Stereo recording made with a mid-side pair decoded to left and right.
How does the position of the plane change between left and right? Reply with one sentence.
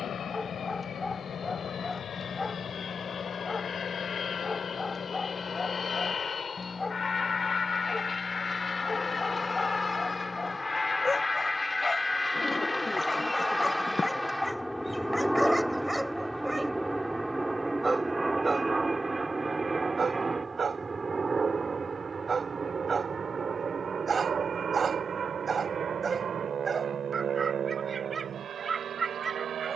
In this clip you hear the plane move from left to right.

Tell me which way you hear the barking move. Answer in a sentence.
You can hear the barking move from left to right.